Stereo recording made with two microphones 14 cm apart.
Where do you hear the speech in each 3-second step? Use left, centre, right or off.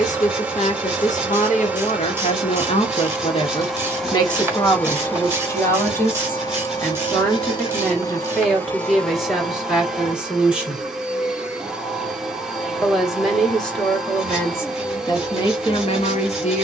left, left, centre, centre, centre, left.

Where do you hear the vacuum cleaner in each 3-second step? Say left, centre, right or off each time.
centre, centre, left, centre, centre, centre.